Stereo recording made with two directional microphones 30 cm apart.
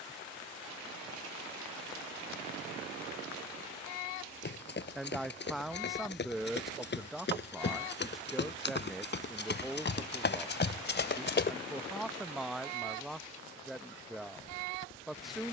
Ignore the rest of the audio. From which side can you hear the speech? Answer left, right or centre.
centre.